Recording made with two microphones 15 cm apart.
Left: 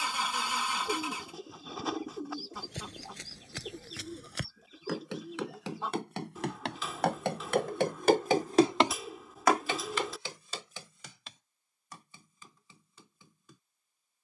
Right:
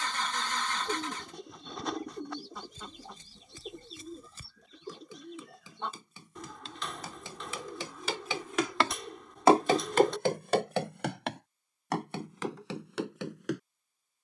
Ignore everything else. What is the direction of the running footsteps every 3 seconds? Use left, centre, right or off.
left, left, left, right, right.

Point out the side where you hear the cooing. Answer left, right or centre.
centre.